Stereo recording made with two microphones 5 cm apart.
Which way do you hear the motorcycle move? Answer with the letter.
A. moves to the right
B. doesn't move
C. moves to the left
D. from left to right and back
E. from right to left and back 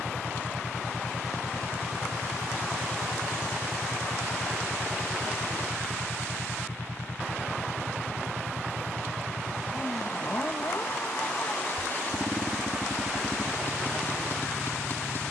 B.